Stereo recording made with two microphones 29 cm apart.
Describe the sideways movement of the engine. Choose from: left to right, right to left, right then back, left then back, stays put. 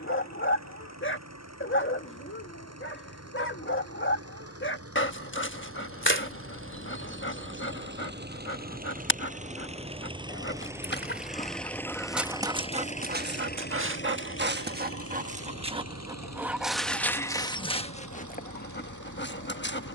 right to left.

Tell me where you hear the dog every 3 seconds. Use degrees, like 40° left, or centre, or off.
40° left, 40° left, 40° left, 30° left, 30° right, centre, 30° left.